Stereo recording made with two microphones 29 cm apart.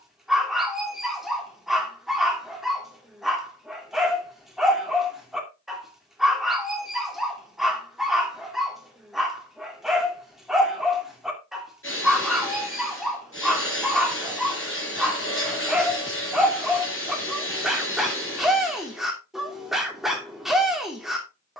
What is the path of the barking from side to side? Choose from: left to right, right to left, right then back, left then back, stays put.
stays put.